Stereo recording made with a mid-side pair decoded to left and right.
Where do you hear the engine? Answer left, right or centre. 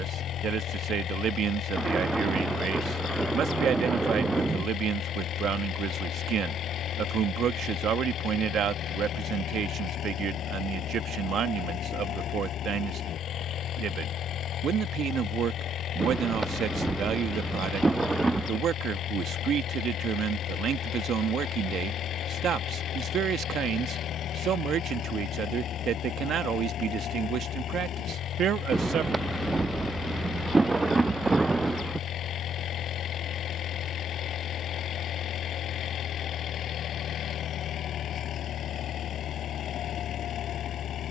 left.